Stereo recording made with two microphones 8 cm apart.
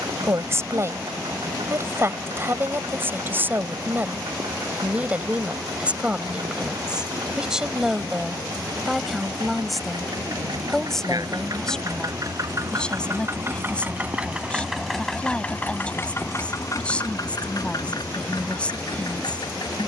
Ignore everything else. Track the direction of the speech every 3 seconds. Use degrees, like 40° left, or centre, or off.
30° right, 20° right, 10° right, centre, 10° left, 20° left, 20° left.